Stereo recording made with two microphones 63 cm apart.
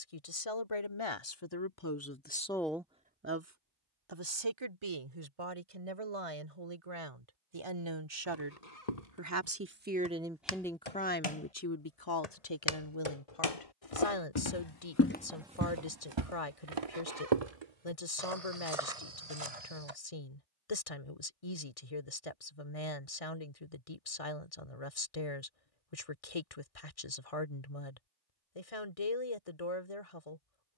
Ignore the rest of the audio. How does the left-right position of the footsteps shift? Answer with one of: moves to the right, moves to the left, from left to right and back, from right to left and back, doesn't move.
moves to the right.